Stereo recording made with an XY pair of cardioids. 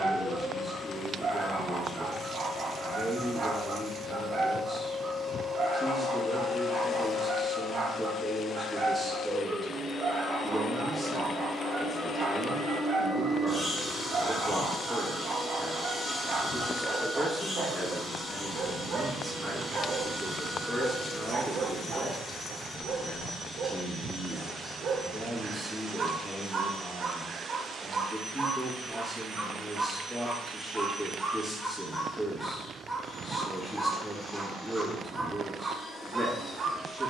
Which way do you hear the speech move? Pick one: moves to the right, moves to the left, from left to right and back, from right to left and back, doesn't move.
doesn't move.